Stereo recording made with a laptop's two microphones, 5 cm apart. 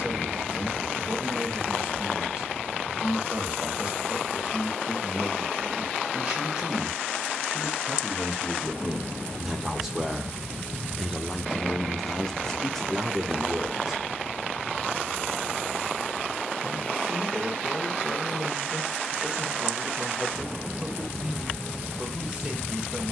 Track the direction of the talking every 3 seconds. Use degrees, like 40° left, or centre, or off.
20° right, 20° right, 20° right, centre, centre, 20° right, 20° right, 20° right.